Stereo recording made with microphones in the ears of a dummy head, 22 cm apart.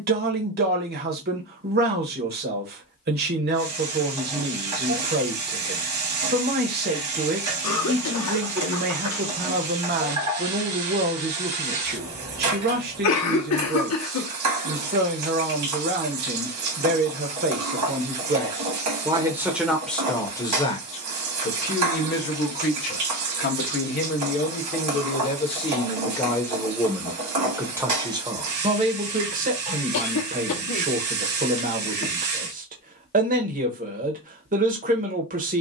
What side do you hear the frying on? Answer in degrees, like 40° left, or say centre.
80° right.